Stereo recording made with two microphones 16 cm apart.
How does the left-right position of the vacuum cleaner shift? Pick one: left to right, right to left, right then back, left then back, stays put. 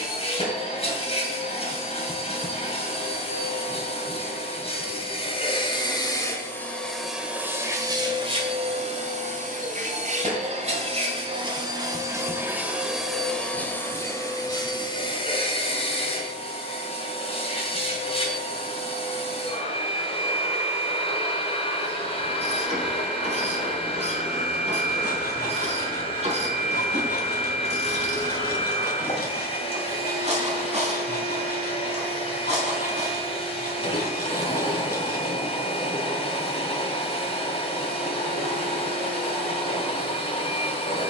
right then back.